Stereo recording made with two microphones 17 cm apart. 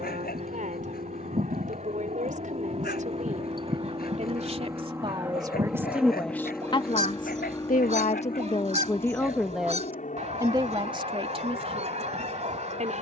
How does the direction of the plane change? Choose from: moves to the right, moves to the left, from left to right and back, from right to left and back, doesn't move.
moves to the left.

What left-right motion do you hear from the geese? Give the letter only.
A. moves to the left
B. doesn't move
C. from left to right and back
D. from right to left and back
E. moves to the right
B.